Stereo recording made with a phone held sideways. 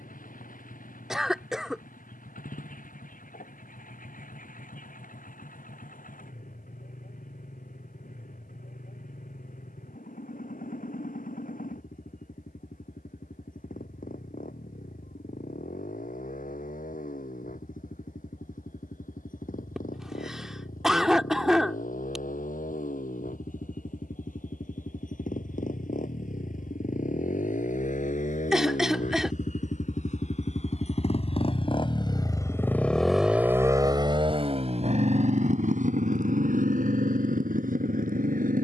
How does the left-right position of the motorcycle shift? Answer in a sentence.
You can hear the motorcycle move to the right.